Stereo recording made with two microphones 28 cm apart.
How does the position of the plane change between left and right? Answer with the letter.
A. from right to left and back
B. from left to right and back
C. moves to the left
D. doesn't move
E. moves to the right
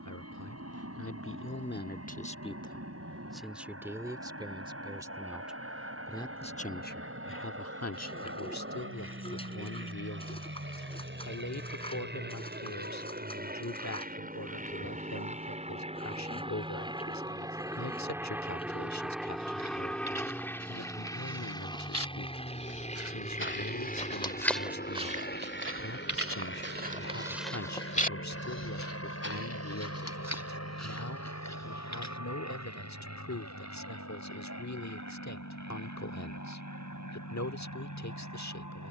C.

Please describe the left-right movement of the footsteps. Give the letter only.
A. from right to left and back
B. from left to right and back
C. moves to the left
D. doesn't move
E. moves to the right
B.